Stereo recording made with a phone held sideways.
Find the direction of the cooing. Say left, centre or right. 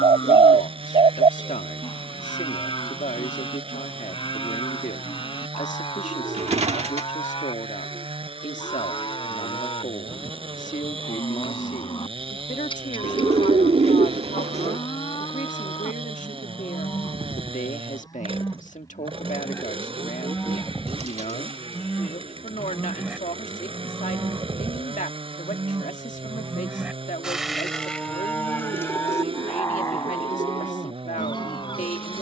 right.